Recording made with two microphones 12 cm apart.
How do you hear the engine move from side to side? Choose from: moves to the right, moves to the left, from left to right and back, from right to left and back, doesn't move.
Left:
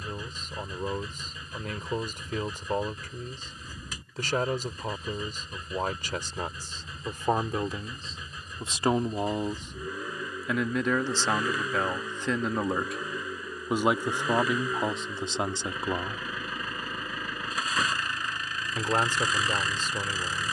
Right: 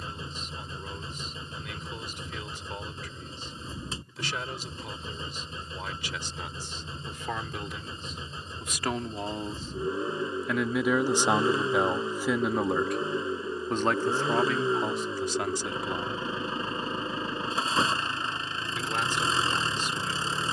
doesn't move.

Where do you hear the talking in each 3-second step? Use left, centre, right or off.
left, left, left, centre, centre, left, left.